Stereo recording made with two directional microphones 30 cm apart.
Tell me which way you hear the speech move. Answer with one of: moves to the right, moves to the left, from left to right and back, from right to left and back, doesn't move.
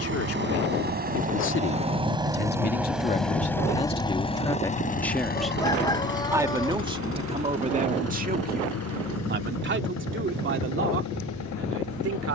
moves to the right.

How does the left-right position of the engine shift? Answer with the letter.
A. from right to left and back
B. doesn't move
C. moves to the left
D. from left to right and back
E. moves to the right
C.